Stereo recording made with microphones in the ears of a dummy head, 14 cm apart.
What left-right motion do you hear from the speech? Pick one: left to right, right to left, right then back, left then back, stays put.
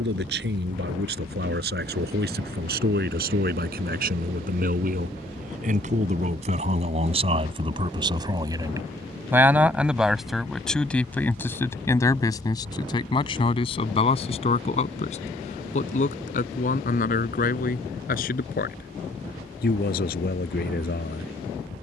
right to left.